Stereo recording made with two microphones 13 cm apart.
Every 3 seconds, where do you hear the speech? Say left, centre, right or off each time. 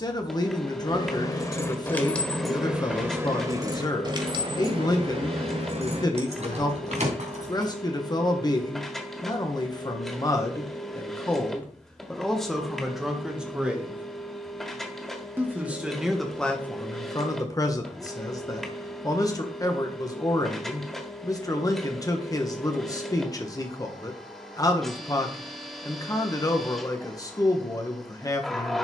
left, left, left, left, centre, centre, left, left, left, left.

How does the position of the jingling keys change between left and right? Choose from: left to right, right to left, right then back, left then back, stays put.
left to right.